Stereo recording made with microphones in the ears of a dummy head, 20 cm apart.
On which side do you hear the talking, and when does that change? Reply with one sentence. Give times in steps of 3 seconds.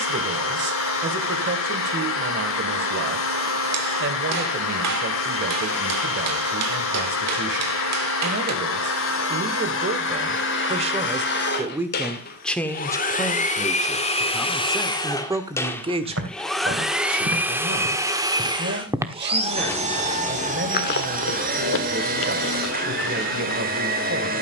You can hear the talking on the right from 0 s, in the centre from 12 s and on the right from 15 s.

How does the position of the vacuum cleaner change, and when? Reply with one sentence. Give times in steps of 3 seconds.
You can hear the vacuum cleaner on the left from 0 s, in the centre from 15 s and on the right from 18 s.